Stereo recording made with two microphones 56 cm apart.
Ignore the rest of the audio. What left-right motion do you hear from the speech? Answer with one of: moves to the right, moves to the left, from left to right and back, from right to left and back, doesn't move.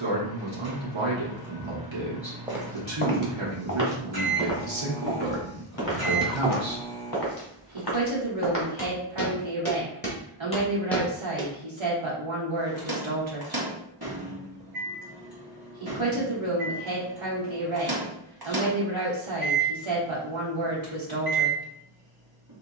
doesn't move.